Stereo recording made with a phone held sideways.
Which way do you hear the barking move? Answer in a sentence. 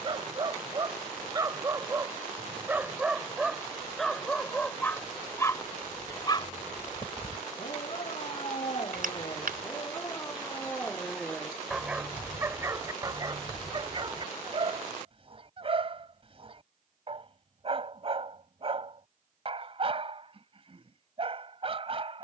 In this clip you hear the barking go left and come back.